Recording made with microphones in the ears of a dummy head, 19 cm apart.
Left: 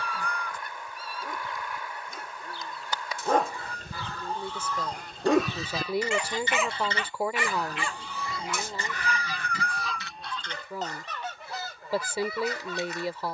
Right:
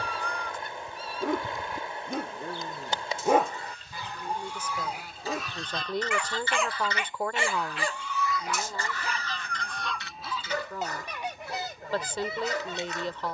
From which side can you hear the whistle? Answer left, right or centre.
left.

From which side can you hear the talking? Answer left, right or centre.
centre.